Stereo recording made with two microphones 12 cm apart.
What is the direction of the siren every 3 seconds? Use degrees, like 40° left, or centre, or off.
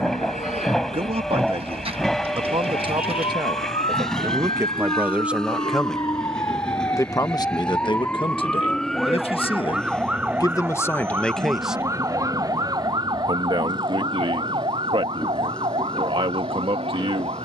60° left, 50° left, 20° left, 10° right, 40° right, 50° right.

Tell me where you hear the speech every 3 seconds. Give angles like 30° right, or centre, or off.
50° right, 20° right, 40° left, 30° left, 50° right, 50° right.